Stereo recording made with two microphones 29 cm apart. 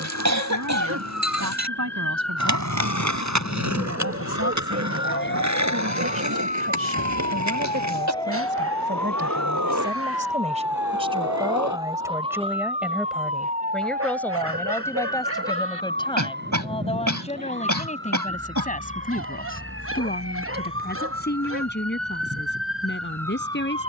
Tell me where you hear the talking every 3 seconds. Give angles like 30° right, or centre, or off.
70° right, 60° right, 40° right, 20° right, centre, 20° left, 30° left, 40° left.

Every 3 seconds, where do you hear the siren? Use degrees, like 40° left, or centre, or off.
60° left, 50° left, 20° left, 10° right, 20° right, 40° right, 40° right, 50° right.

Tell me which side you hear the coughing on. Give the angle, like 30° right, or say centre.
70° right.